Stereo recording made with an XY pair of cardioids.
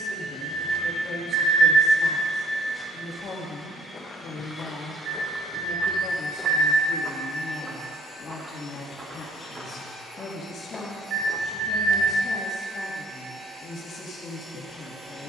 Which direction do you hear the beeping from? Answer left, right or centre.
right.